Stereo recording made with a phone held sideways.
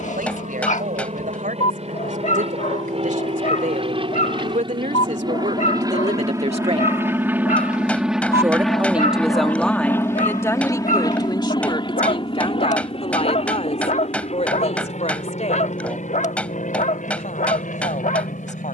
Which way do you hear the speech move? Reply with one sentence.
You can hear the speech travel towards the left.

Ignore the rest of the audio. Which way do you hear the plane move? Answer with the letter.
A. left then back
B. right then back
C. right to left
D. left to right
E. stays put
C.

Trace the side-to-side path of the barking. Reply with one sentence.
You can hear the barking stay put.